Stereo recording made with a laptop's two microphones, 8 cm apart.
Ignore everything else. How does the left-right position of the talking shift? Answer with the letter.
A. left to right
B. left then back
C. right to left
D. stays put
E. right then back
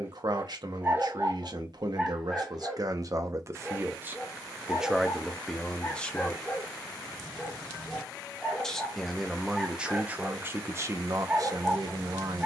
B.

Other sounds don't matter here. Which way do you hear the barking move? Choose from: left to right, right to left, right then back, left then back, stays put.
left then back.